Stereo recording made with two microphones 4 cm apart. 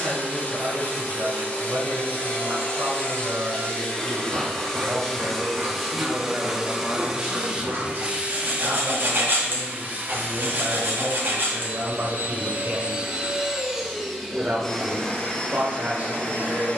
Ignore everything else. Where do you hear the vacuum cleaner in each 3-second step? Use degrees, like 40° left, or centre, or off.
30° left, 10° left, 20° right, 40° right, 10° right, 30° left.